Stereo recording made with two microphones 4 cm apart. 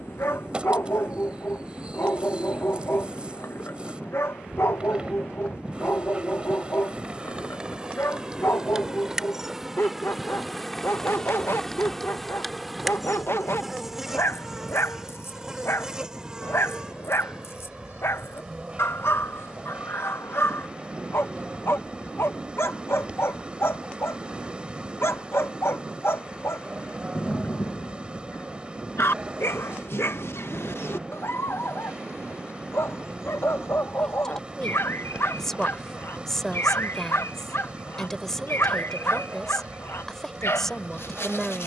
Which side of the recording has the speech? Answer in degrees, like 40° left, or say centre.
10° left.